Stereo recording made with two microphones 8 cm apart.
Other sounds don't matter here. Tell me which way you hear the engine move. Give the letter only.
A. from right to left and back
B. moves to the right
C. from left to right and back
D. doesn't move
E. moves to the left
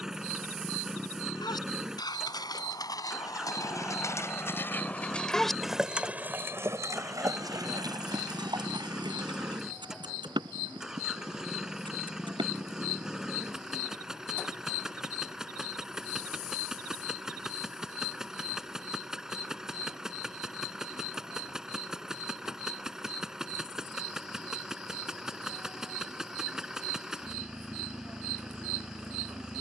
D.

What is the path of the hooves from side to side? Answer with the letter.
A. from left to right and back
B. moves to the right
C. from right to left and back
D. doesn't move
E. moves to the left
B.